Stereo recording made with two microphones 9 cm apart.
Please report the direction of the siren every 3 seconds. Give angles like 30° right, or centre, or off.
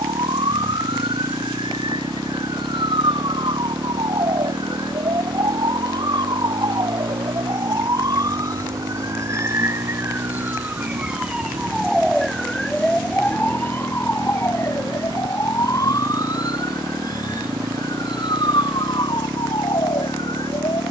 70° right, 60° right, 50° right, 20° right, 20° left, 40° left, 60° left.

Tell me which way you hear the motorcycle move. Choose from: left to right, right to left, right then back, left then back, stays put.
stays put.